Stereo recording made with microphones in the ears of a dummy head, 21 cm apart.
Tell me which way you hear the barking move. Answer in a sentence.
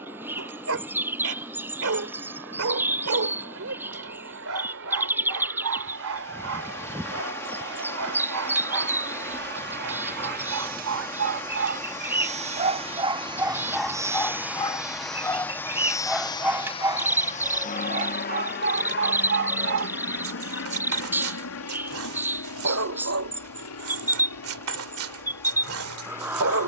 In this clip you hear the barking go left and come back.